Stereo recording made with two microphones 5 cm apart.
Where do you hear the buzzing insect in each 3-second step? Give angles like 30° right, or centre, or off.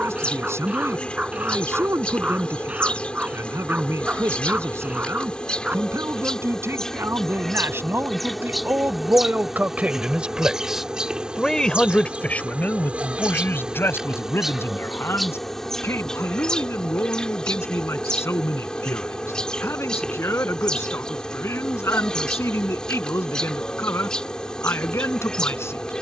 20° left, 20° left, 10° left, 20° right, 20° right, 10° left, 20° left, 20° left, 20° left.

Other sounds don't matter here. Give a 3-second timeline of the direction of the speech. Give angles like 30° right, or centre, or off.
70° right, 70° right, 60° right, 20° right, 50° left, 70° left, 70° left, 70° left, 70° left.